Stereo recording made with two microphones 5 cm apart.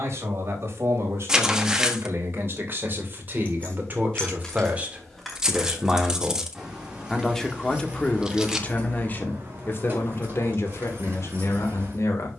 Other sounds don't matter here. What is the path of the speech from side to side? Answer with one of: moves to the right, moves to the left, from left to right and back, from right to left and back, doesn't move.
moves to the left.